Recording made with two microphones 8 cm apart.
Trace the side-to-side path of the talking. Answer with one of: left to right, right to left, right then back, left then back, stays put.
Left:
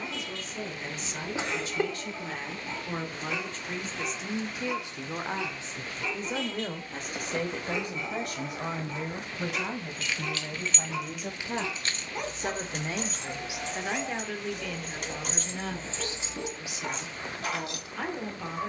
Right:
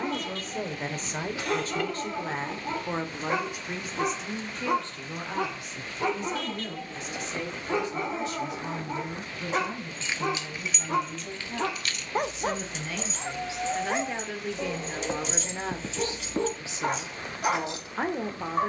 left then back.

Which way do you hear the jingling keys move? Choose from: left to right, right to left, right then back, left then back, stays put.
left then back.